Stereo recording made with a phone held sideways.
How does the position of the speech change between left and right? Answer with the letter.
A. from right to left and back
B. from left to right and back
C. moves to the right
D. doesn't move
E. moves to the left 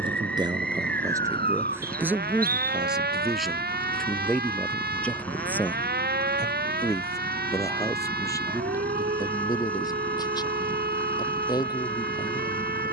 E.